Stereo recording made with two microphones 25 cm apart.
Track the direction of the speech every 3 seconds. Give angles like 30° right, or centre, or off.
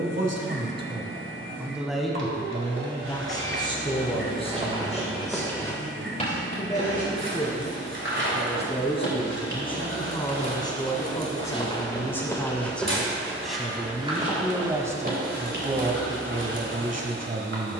10° right, 20° left, 30° left, 20° left, centre, 30° right.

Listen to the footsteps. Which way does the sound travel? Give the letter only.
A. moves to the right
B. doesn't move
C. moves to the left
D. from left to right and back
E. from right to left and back
E.